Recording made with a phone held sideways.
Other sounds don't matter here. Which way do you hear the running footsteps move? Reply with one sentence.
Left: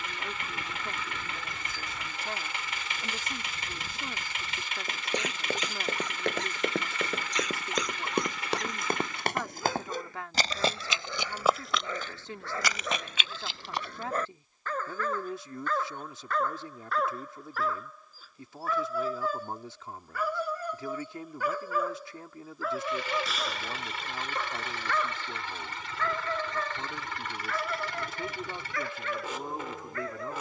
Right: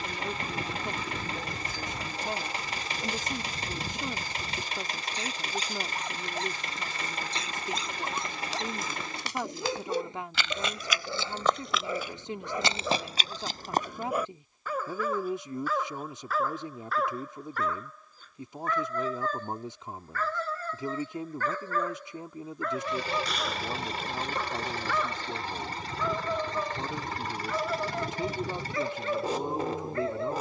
In this clip you hear the running footsteps travel towards the right.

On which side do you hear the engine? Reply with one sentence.
In this clip you hear the engine on the right.